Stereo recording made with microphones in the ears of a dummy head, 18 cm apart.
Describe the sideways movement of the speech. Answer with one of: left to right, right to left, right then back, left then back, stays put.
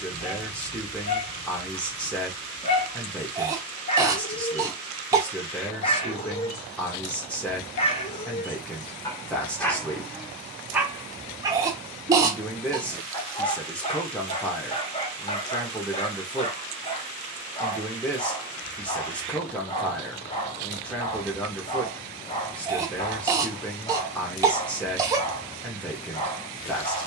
stays put.